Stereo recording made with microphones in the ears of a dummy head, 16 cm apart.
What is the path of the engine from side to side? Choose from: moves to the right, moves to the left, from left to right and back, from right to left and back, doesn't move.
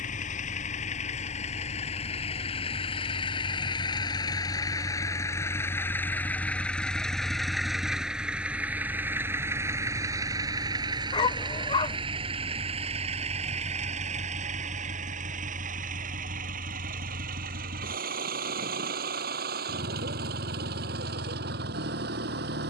moves to the right.